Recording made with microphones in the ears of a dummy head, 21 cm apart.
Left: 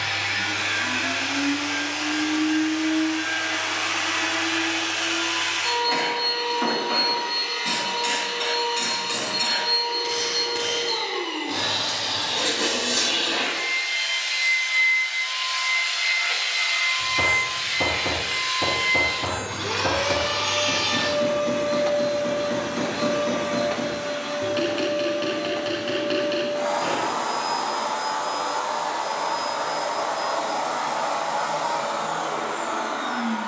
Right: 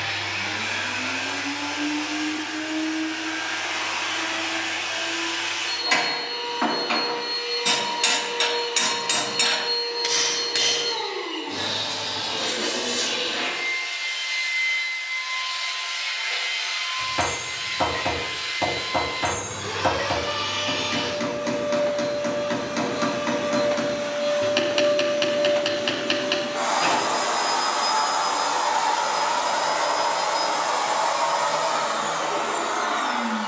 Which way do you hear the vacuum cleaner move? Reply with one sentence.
In this clip you hear the vacuum cleaner move from left to right.